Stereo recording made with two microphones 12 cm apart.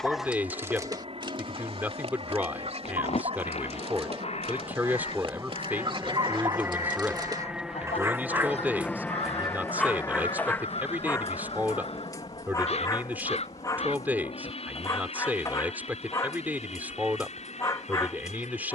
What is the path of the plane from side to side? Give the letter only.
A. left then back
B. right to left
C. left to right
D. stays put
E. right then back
B.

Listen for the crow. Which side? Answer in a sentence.
In this clip you hear the crow on the left.